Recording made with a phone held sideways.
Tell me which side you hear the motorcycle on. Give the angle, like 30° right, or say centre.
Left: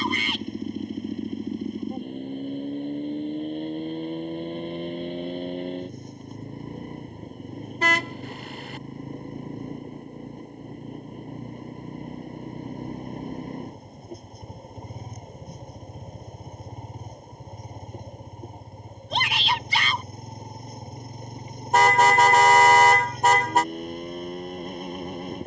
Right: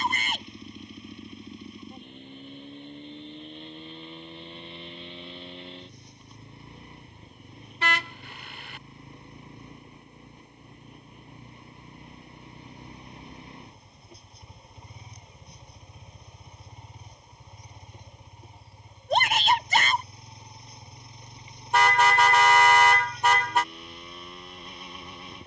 40° left.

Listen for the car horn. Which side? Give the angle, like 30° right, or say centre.
40° left.